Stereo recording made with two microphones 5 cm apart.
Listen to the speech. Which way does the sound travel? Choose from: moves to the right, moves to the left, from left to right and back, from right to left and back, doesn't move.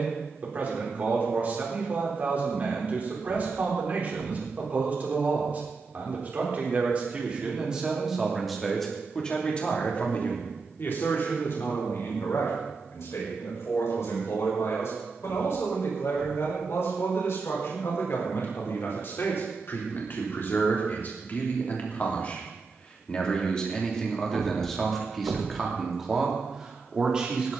from right to left and back.